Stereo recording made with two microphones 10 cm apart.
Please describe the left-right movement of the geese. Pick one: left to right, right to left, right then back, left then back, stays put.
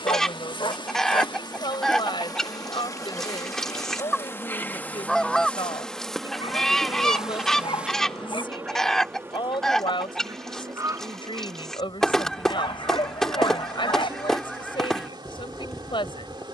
stays put.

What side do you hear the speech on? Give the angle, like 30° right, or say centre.
60° left.